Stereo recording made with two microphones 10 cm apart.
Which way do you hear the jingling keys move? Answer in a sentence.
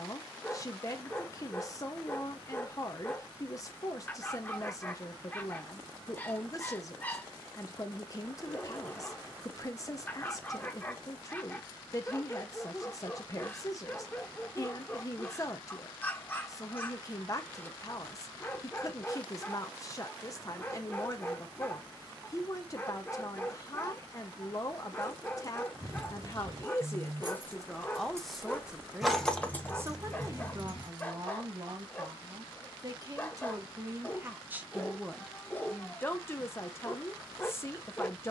In this clip you hear the jingling keys go from the right side to the left.